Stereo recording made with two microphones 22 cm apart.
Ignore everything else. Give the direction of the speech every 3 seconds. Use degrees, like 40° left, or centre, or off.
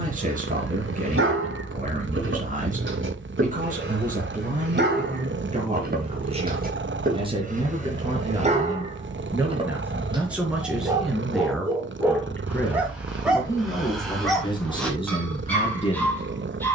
40° right, 30° right, 20° right, centre, 10° left, 30° left.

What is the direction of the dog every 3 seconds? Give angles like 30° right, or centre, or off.
70° right, 50° right, 40° right, 20° right, centre, 10° left.